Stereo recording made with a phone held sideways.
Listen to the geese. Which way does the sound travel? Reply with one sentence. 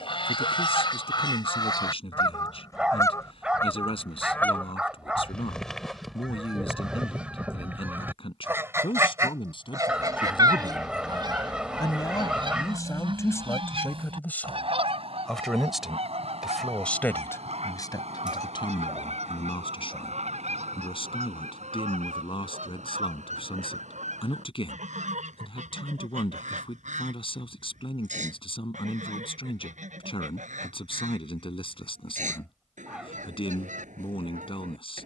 In this clip you hear the geese move from left to right.